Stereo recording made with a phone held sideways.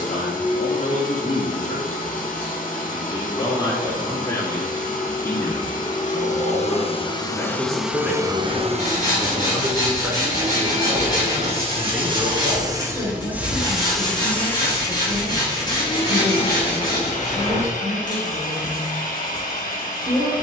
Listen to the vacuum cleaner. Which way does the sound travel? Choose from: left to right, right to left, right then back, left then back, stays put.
right then back.